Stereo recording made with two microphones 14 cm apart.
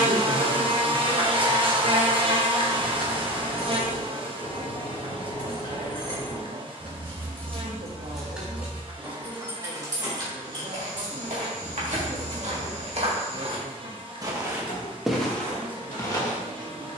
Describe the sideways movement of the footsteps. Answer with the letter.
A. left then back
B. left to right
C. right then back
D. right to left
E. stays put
D.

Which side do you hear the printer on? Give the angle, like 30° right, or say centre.
80° left.